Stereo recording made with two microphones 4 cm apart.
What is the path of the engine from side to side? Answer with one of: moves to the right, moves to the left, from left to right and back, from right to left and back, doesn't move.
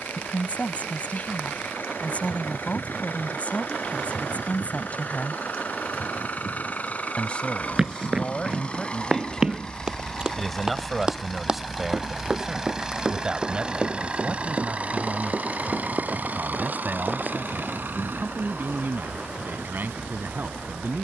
moves to the right.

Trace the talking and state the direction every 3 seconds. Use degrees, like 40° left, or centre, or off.
40° left, 40° left, 30° left, centre, 20° right, 40° right, 50° right.